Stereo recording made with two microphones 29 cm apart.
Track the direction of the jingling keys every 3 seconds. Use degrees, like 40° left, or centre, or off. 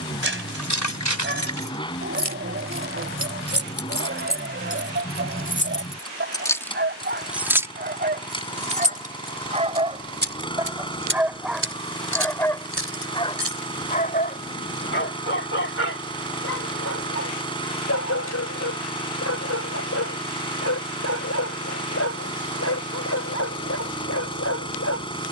70° left, 40° left, 10° right, 40° right, 50° right, off, off, off, off.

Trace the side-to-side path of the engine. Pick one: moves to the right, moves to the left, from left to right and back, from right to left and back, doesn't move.
doesn't move.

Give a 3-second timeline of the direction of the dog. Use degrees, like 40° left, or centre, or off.
40° right, 40° right, 40° right, 10° right, 20° left, 50° left, 60° left, 60° left, 60° left.